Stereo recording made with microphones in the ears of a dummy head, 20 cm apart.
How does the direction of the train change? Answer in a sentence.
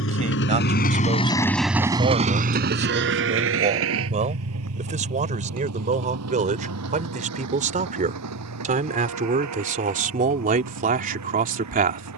You can hear the train move from left to right.